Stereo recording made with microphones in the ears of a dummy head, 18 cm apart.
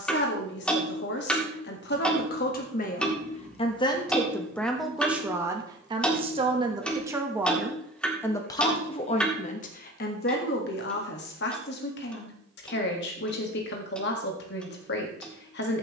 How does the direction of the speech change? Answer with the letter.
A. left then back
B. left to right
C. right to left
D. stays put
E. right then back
E.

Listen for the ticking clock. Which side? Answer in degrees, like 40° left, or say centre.
centre.